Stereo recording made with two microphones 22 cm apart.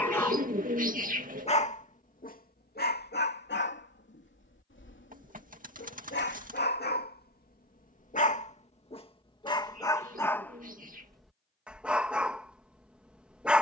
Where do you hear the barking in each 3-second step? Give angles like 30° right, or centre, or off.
30° left, 60° left, 40° left, 10° left, 10° right.